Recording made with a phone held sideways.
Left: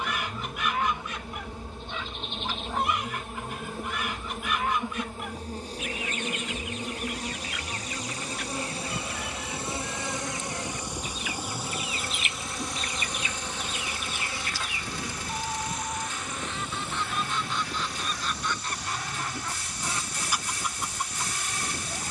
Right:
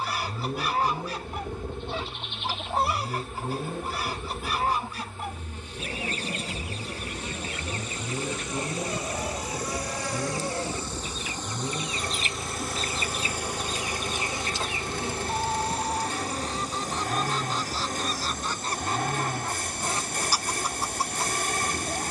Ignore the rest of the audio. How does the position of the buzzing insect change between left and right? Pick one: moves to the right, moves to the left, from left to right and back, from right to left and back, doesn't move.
moves to the right.